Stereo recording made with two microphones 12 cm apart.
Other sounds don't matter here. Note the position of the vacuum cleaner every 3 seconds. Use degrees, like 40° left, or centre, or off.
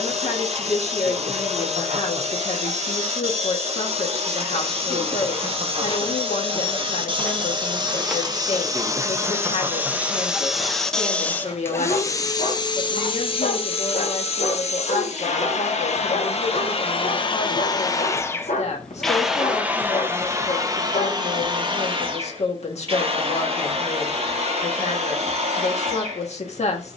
60° right, 50° right, 40° right, centre, 50° left, 50° left, 10° right, 40° right, 50° right.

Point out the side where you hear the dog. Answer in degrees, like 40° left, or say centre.
80° left.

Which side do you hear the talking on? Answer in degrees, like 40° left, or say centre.
60° left.